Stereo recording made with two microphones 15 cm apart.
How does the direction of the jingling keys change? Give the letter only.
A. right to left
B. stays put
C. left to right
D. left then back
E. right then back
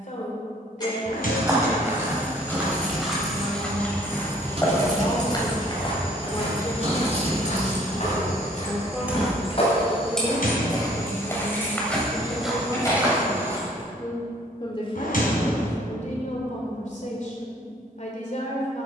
E.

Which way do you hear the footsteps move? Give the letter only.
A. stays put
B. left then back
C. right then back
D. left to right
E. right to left
B.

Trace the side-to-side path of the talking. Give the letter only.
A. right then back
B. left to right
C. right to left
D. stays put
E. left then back
A.